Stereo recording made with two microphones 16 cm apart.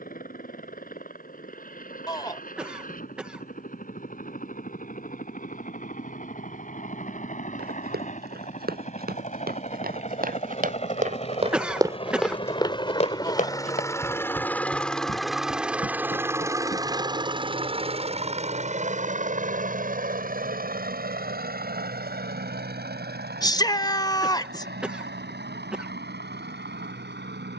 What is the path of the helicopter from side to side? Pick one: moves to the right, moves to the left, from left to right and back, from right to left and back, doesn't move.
moves to the right.